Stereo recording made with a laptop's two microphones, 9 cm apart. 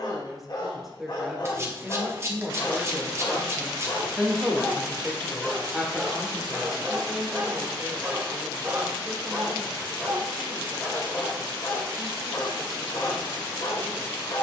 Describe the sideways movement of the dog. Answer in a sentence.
In this clip you hear the dog go right and come back.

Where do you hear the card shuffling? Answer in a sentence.
You can hear the card shuffling on the right.